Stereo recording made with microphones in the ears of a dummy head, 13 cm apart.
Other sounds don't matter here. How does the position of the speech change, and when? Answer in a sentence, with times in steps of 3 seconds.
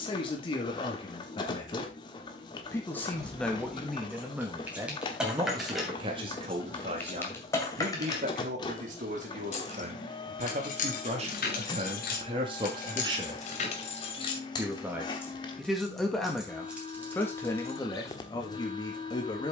In this clip you hear the speech on the left from 0 s, in the centre from 3 s, on the right from 6 s, in the centre from 15 s and on the left from 18 s.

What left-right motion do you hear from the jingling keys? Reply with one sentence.
In this clip you hear the jingling keys go left and come back.